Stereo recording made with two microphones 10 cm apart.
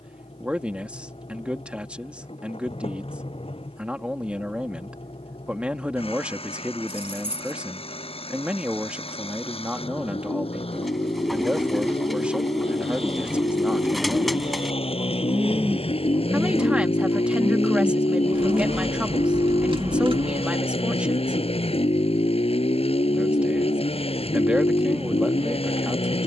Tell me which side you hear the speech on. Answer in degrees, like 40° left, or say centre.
10° right.